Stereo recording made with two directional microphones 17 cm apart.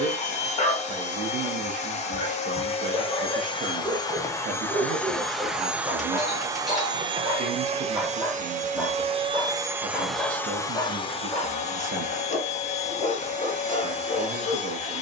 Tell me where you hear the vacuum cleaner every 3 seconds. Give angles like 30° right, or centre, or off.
40° left, 10° left, 30° right, 10° left, 40° left.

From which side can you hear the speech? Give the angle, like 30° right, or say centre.
50° right.